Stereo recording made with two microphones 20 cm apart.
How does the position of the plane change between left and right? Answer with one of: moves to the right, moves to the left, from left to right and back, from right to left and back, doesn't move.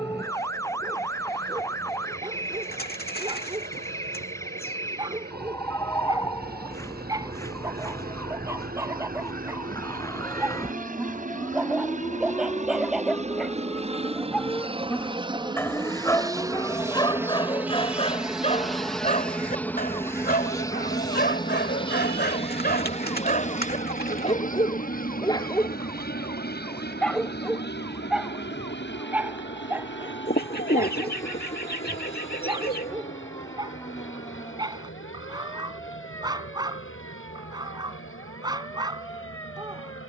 moves to the left.